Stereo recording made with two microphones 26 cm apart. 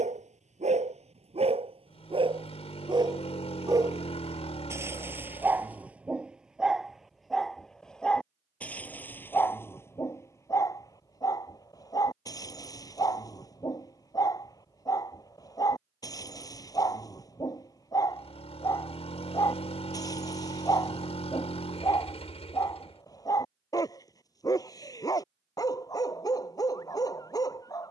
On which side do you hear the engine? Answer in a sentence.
You can hear the engine on the left.